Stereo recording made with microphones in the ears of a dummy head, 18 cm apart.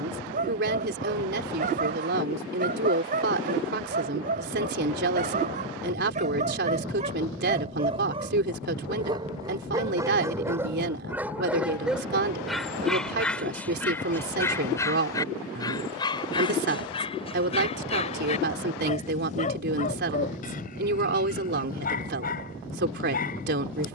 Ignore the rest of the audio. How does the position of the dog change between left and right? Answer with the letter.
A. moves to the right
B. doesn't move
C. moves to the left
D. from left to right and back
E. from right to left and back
C.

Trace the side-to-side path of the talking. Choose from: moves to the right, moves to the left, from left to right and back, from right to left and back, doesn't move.
doesn't move.